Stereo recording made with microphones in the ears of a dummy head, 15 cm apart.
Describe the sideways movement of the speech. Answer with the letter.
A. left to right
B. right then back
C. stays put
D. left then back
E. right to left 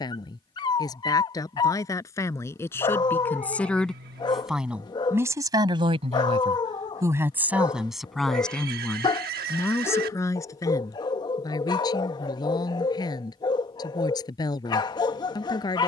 B.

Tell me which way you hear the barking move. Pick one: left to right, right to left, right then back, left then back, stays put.
stays put.